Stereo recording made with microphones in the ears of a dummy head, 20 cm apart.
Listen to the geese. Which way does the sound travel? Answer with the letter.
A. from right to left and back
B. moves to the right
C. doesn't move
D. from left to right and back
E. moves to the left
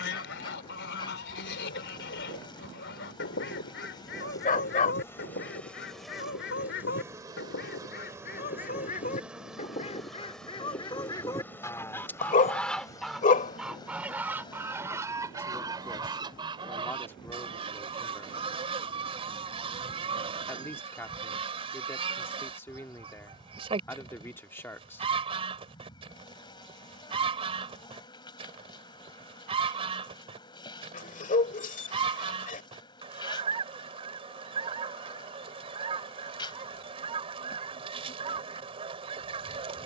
B.